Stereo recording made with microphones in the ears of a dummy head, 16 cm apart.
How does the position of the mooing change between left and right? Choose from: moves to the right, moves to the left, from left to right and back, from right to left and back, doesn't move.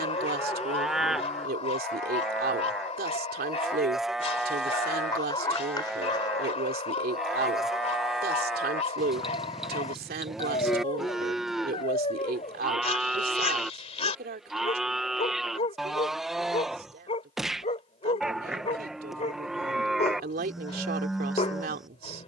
doesn't move.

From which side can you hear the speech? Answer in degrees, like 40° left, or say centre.
50° right.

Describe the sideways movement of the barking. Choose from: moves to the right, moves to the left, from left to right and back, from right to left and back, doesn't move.
doesn't move.